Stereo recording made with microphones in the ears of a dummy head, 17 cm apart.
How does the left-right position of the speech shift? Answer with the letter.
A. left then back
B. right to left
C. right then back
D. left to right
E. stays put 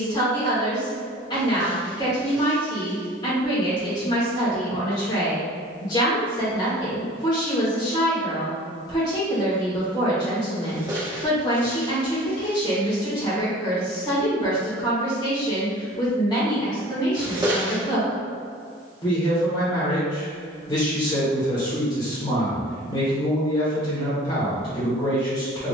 E.